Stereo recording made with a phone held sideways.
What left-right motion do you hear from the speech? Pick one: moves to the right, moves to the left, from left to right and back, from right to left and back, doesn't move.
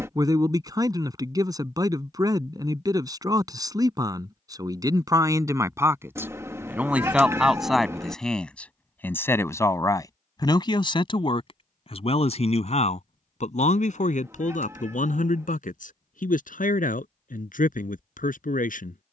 moves to the left.